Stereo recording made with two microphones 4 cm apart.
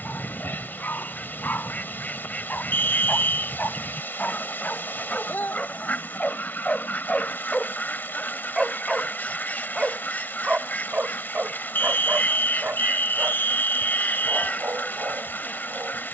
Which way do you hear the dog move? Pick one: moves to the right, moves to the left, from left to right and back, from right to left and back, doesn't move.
moves to the right.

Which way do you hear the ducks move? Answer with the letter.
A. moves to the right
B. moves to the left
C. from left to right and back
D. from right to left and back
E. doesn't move
E.